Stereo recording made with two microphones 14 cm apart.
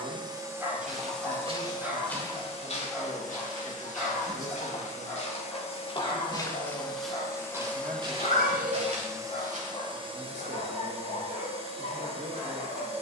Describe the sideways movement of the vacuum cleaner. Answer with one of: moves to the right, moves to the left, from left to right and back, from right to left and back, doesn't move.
from right to left and back.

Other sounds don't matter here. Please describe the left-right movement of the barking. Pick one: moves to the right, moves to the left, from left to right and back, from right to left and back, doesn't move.
moves to the left.